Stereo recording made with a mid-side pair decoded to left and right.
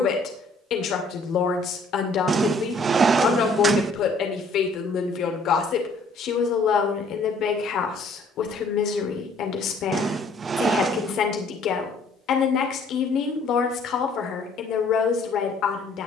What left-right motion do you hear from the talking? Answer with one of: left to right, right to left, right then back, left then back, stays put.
stays put.